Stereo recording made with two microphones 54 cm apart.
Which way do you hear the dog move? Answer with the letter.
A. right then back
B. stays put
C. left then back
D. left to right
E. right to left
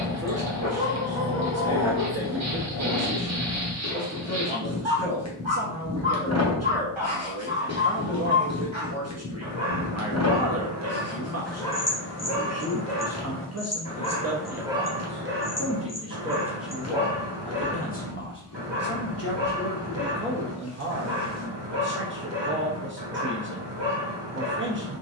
C.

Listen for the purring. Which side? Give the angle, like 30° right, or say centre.
30° left.